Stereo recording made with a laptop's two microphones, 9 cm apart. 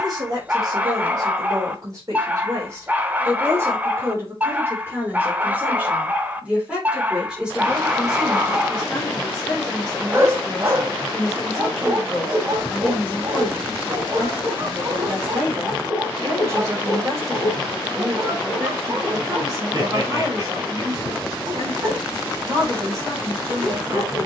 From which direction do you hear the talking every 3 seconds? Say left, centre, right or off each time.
right, right, centre, centre, centre, right, right, right.